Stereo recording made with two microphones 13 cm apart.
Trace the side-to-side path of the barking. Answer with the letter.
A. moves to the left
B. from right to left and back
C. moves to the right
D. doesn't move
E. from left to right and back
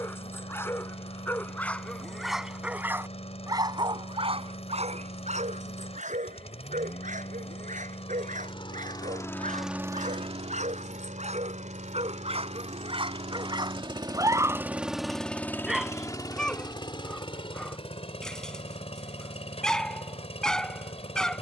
E.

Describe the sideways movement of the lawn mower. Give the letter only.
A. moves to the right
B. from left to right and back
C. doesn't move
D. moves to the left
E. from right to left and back
B.